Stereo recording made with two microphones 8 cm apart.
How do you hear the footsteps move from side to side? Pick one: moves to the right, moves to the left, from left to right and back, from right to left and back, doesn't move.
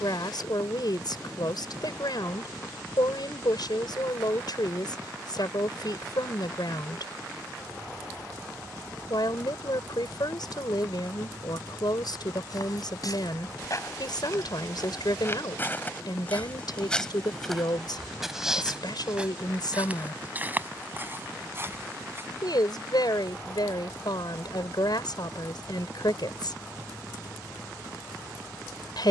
moves to the right.